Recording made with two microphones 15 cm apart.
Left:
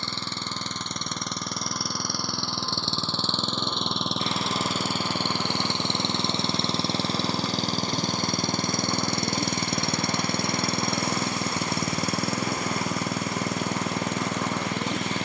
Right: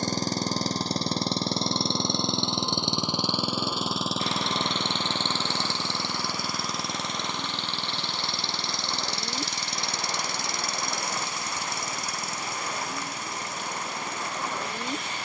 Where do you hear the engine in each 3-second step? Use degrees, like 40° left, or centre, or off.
30° right, centre, 40° left, 60° left, 70° left.